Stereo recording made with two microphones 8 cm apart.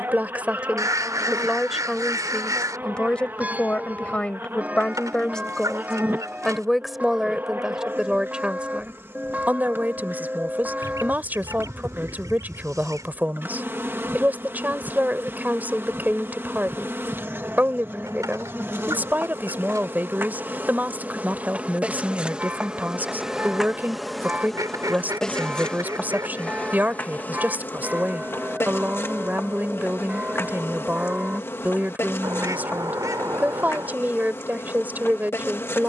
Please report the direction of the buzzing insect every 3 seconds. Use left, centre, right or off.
right, right, right, right, right, right, right, centre, centre, left, left, left.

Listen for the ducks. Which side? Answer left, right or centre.
right.